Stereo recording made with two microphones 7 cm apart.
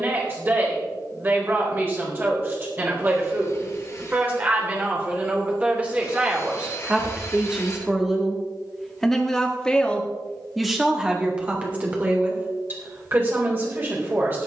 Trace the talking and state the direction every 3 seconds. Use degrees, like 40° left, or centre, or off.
30° right, 20° right, 10° right, 10° right, 30° right.